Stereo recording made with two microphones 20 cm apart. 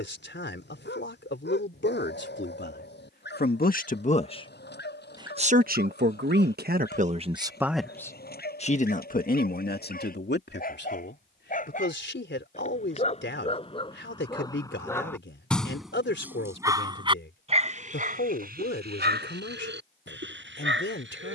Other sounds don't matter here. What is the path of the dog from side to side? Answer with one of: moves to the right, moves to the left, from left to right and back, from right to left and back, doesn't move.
moves to the right.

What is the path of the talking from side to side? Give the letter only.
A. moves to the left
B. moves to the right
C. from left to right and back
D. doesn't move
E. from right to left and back
C.